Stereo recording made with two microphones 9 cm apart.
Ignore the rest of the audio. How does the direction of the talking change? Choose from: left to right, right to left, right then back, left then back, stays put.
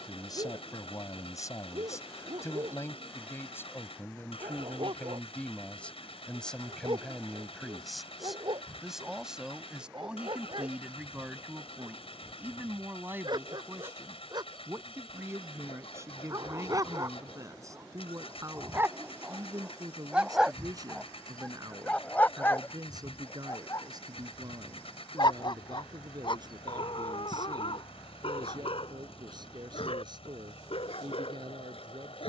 left to right.